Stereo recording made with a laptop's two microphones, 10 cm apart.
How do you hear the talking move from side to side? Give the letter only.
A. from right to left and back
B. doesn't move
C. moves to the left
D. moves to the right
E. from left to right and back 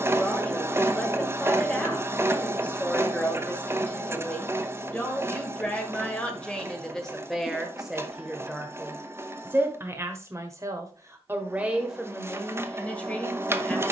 E.